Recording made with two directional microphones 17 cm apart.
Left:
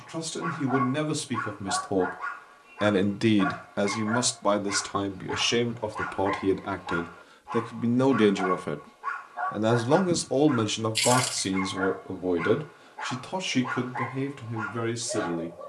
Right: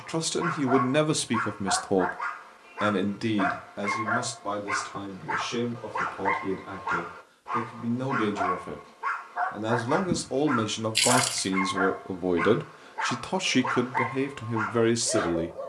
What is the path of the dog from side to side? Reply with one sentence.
In this clip you hear the dog stay put.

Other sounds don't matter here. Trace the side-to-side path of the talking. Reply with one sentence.
In this clip you hear the talking move from right to left and back again.